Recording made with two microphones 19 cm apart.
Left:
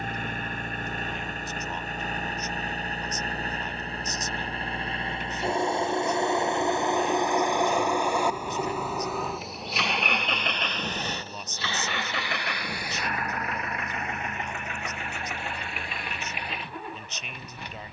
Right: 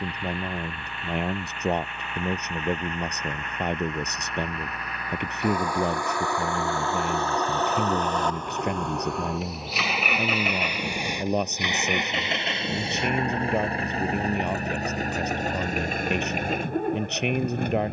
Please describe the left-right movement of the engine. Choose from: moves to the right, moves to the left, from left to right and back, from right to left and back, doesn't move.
moves to the right.